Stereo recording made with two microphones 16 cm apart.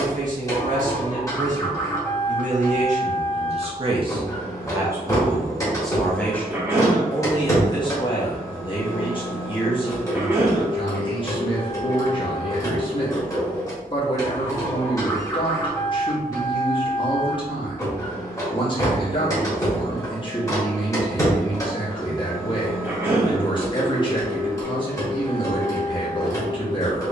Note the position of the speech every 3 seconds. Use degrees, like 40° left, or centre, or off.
50° right, 20° right, 20° left, 30° left, 30° left, 30° left, 30° left, 30° left, 30° left.